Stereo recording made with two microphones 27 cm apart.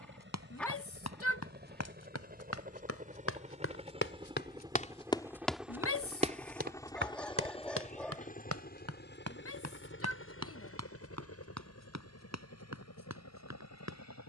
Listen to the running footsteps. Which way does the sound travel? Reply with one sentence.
In this clip you hear the running footsteps go from the left side to the right.